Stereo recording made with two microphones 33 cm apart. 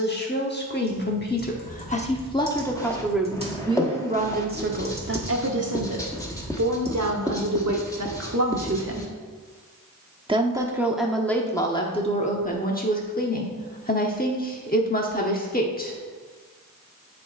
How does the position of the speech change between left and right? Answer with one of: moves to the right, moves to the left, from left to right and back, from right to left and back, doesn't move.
from left to right and back.